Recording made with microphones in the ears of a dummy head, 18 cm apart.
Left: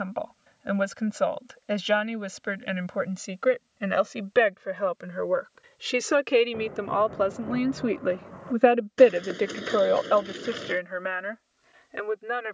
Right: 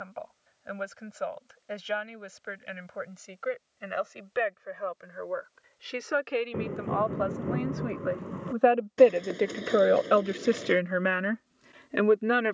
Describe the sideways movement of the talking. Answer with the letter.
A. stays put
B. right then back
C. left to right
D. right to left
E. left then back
C.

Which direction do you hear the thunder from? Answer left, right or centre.
right.